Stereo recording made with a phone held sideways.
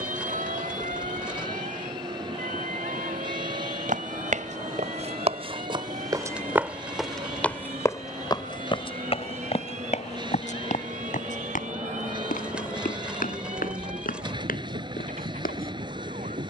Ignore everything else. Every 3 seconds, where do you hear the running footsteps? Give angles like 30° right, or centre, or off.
off, 50° right, 10° left, 50° left, 60° left, 70° left.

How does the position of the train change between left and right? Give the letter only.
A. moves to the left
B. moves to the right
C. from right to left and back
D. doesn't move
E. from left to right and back
D.